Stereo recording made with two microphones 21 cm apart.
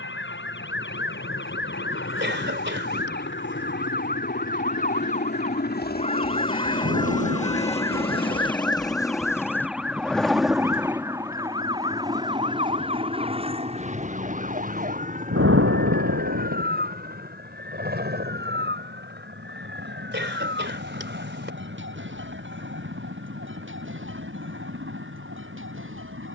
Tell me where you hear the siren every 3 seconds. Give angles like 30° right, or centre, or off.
60° left, 40° left, 20° left, 10° right, 30° right, 40° right, 50° right, 60° right, 60° right.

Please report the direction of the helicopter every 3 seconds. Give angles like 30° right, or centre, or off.
70° left, 60° left, 30° left, centre, 30° right, 40° right, 50° right, 50° right, 60° right.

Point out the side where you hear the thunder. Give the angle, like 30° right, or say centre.
80° right.